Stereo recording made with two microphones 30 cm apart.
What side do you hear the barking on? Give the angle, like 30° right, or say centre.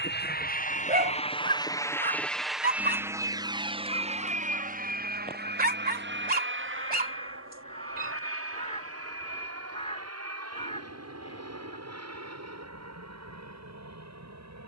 30° right.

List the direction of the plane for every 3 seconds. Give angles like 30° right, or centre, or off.
20° left, 20° right, 40° right, 50° right, 60° right.